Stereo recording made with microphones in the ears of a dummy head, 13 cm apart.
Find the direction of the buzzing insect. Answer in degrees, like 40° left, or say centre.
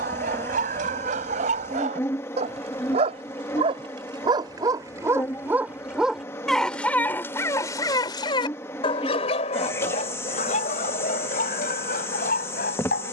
20° left.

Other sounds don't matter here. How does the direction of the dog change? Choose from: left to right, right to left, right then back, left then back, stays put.
right to left.